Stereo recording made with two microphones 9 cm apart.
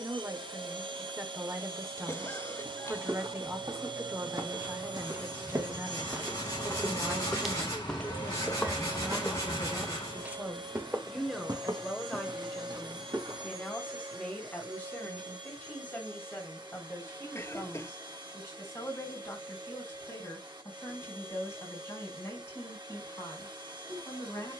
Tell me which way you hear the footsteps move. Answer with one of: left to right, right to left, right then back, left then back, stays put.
left then back.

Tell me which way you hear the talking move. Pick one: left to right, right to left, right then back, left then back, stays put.
right to left.